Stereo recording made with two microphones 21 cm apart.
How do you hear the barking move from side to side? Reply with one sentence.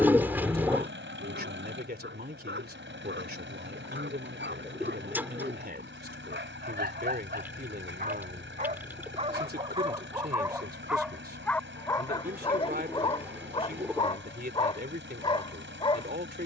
In this clip you hear the barking go from the right side to the left.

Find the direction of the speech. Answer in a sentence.
You can hear the speech on the right.